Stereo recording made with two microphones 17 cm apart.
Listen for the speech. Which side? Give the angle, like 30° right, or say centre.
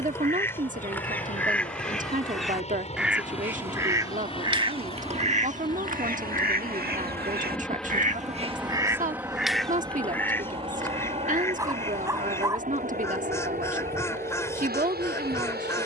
50° right.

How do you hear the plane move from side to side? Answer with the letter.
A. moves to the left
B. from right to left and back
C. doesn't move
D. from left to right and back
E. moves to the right
E.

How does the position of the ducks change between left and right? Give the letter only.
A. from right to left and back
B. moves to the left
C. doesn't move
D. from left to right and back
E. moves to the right
D.